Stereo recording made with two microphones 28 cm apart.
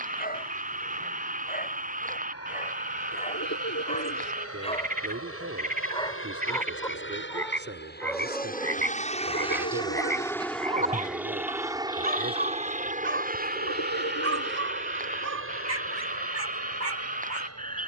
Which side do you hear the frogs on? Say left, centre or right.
right.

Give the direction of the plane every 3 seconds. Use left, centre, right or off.
left, left, left, centre, right, right.